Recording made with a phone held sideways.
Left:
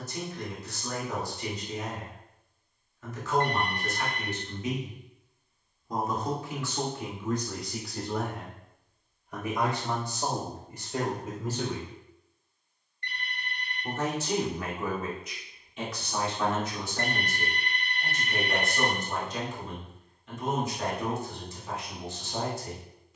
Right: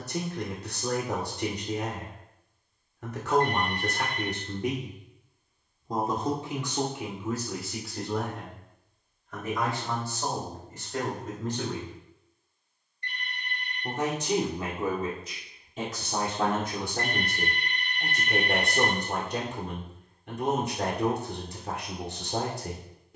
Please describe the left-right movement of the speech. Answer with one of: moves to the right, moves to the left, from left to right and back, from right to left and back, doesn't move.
from right to left and back.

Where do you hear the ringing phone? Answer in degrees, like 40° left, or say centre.
60° left.